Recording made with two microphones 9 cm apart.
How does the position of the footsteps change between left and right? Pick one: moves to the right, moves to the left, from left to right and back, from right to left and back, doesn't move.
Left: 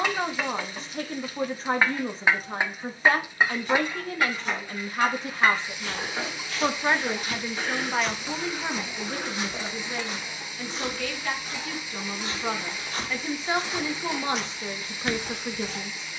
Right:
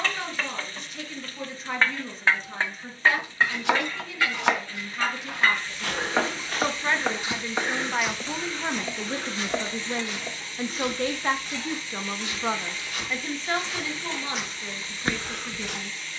from right to left and back.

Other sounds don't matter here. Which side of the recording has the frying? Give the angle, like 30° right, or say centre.
10° left.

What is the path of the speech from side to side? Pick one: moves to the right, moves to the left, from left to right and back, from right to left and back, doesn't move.
from left to right and back.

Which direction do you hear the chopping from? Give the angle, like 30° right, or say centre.
80° right.